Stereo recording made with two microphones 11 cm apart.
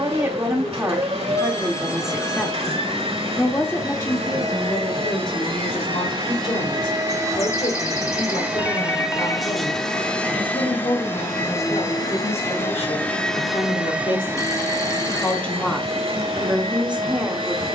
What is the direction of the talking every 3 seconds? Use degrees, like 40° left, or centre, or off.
10° right, 30° left, 50° left, 70° left, 60° left, centre.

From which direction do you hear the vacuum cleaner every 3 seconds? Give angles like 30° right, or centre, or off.
60° right, 50° right, 30° right, 10° left, centre, 50° right.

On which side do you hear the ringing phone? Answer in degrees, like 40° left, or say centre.
30° left.